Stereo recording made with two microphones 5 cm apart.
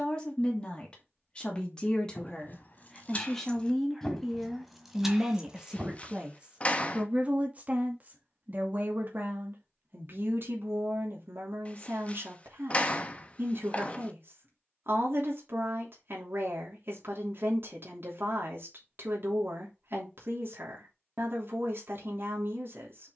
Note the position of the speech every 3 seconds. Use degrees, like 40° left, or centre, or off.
20° left, centre, 30° right, 50° right, 60° right, 60° right, 60° right, 60° right.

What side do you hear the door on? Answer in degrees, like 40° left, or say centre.
30° left.